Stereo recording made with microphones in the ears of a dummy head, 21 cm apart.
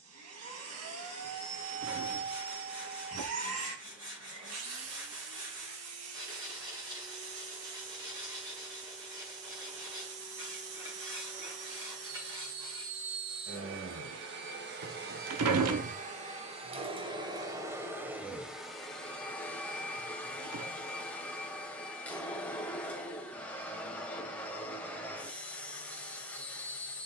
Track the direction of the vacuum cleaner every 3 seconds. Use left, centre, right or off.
right, right, right, right, right, right, centre, centre, centre.